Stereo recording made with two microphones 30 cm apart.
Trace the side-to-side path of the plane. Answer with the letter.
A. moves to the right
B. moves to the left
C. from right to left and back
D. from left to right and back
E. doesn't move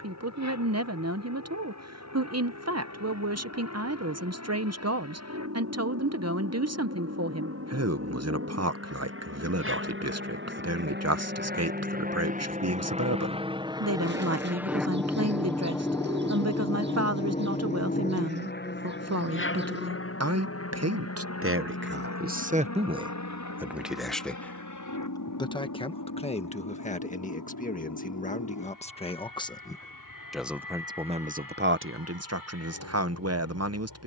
B.